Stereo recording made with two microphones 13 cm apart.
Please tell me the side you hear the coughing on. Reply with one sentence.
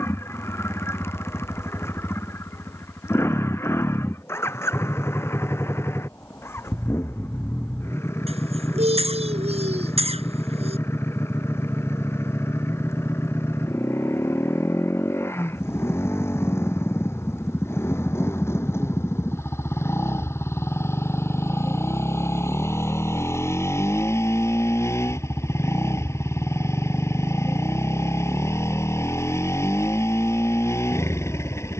You can hear the coughing on the right.